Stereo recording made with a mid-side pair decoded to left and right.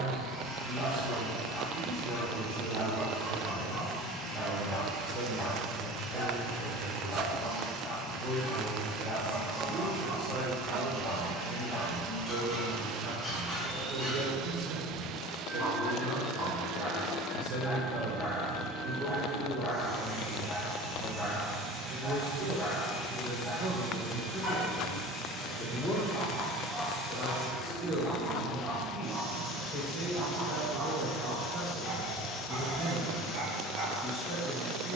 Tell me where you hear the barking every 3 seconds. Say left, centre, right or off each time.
left, left, left, left, left, left, left, left, left, centre, right, right.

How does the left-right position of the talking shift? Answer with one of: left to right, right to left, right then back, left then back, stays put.
right to left.